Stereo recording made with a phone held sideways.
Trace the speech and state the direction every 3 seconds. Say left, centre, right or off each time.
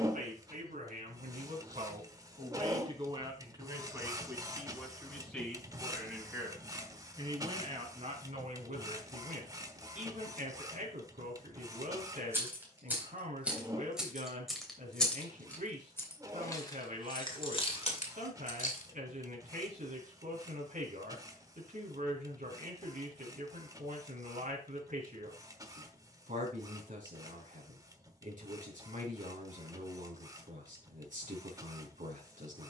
right, centre, right, right, right, right, right, right, right, right, right.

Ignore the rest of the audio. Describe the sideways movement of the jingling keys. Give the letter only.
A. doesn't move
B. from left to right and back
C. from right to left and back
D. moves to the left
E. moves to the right
D.